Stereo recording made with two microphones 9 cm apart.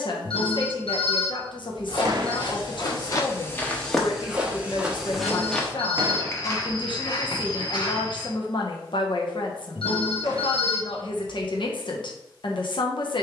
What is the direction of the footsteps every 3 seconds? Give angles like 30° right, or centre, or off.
60° left, 10° left, 50° left, off, off.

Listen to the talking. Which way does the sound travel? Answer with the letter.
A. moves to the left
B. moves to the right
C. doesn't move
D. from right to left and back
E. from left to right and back
C.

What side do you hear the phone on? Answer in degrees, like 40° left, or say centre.
80° left.